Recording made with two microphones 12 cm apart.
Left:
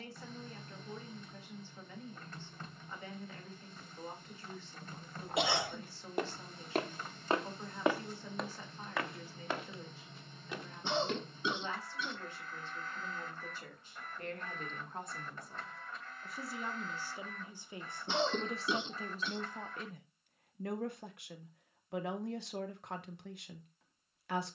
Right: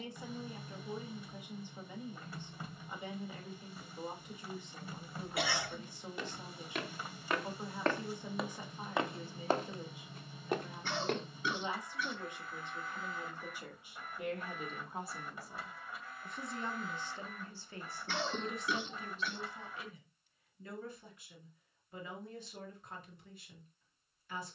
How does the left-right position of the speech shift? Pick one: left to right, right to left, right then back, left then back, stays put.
right to left.